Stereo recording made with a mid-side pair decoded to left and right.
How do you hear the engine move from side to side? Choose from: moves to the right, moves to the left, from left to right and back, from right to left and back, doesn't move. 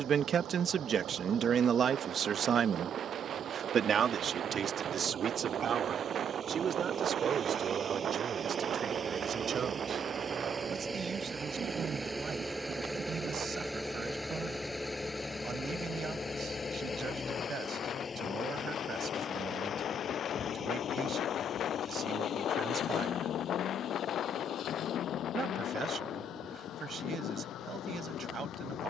moves to the left.